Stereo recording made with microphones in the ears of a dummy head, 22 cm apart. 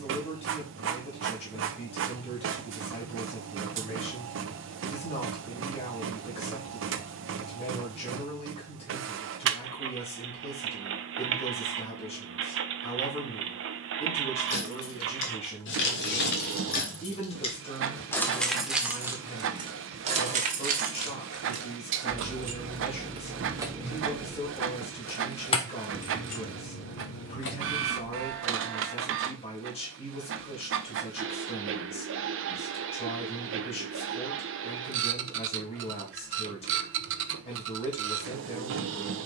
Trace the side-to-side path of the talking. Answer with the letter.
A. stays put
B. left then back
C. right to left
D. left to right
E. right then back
A.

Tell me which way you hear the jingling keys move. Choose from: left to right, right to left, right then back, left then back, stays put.
right then back.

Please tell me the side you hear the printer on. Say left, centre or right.
right.